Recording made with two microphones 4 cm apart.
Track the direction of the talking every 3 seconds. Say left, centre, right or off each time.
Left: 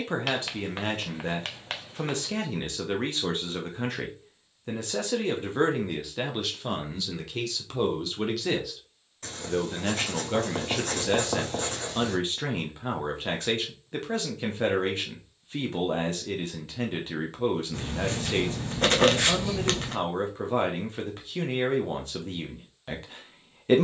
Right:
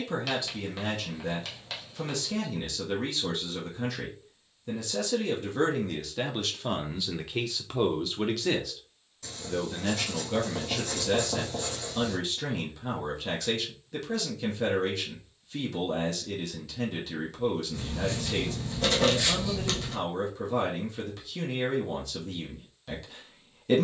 left, left, centre, left, left, left, left, left.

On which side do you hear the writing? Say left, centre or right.
left.